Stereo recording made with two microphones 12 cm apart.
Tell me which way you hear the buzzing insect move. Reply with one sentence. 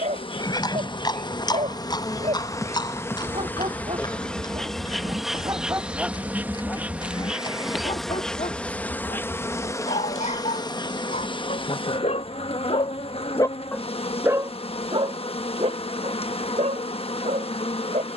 You can hear the buzzing insect go right and come back.